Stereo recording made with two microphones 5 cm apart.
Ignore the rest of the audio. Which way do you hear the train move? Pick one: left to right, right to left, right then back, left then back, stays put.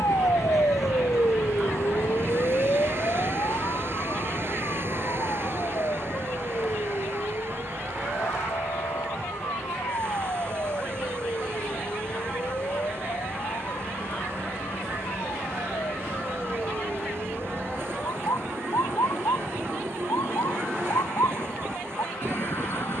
stays put.